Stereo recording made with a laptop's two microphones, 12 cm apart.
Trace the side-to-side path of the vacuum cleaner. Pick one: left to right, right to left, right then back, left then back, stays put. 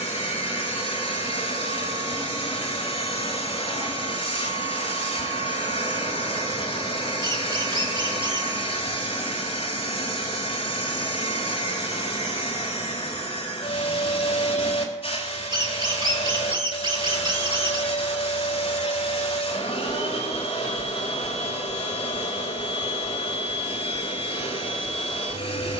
stays put.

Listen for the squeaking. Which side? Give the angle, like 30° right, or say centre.
40° right.